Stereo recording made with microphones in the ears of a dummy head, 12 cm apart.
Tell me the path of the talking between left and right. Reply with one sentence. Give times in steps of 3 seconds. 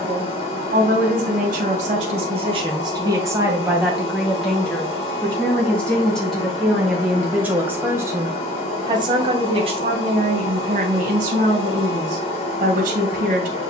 In this clip you hear the talking on the right from 0 s, in the centre from 3 s and on the right from 9 s.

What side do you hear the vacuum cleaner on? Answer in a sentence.
In this clip you hear the vacuum cleaner on the left.